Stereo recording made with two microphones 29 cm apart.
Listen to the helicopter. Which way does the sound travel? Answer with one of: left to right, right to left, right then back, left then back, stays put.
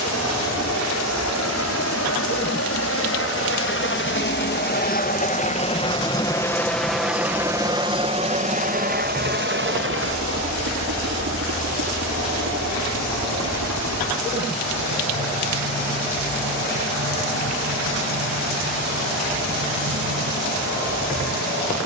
left to right.